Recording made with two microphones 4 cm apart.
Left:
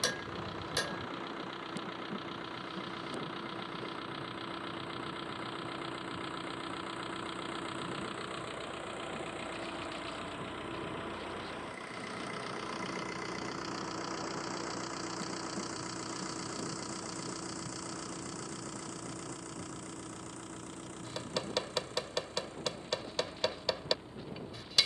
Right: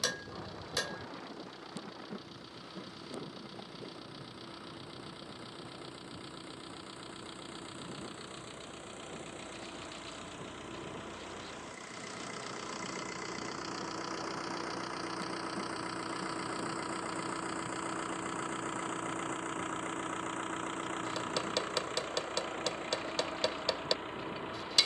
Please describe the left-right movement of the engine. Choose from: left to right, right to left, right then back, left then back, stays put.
left to right.